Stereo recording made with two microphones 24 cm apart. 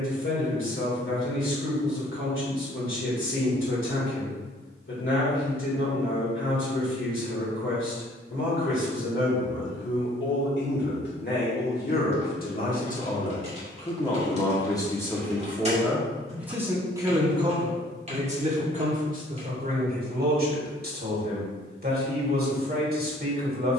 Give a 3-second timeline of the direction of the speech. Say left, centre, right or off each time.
left, left, left, left, left, centre, right, right.